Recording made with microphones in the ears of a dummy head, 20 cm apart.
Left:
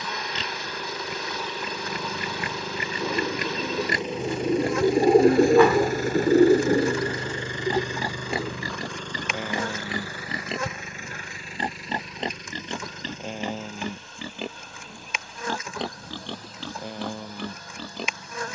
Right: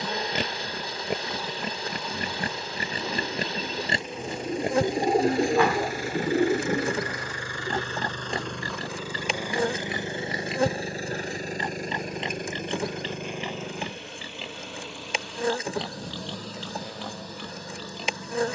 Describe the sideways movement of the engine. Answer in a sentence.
You can hear the engine go from the left side to the right.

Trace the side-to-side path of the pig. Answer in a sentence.
In this clip you hear the pig go from the right side to the left.